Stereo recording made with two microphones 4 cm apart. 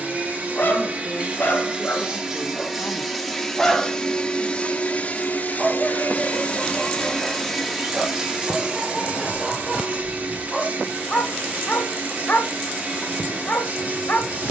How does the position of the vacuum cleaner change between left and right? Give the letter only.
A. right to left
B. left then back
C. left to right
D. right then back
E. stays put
B.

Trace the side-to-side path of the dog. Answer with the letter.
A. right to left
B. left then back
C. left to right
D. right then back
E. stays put
D.